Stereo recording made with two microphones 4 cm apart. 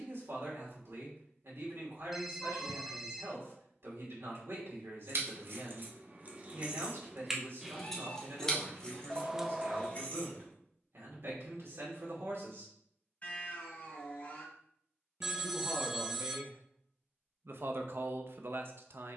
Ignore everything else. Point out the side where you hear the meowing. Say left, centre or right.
left.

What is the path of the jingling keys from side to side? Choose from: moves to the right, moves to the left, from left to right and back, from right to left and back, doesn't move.
moves to the left.